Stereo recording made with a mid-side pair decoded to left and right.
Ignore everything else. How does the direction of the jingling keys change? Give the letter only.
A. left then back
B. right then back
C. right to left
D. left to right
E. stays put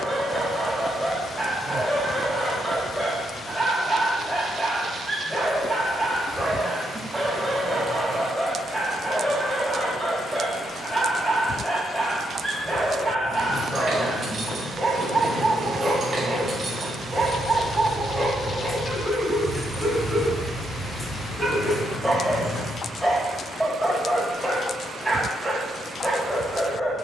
C.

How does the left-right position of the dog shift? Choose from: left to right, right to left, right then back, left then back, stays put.
stays put.